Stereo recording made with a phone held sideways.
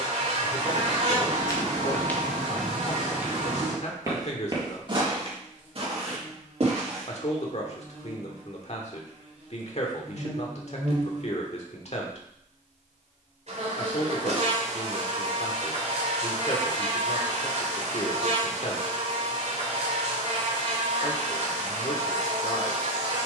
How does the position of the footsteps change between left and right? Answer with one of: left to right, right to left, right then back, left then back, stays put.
left to right.